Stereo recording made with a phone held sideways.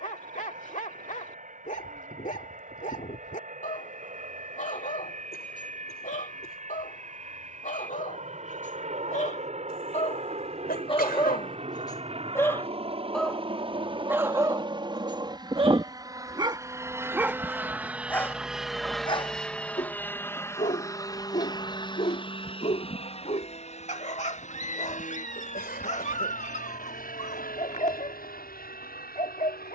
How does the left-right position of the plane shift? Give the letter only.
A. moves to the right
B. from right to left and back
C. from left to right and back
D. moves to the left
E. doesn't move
D.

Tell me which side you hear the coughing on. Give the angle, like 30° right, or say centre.
80° left.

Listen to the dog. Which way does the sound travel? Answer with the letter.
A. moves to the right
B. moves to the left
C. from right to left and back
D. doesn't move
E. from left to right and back
E.